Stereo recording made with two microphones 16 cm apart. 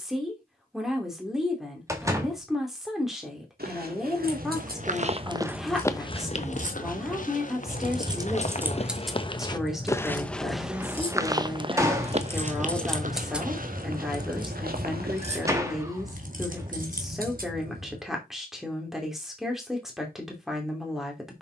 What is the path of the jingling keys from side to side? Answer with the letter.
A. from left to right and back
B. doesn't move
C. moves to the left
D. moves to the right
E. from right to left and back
E.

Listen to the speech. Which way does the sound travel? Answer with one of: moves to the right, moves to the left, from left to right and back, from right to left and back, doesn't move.
doesn't move.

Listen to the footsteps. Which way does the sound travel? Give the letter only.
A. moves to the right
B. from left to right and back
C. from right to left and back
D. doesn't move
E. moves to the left
C.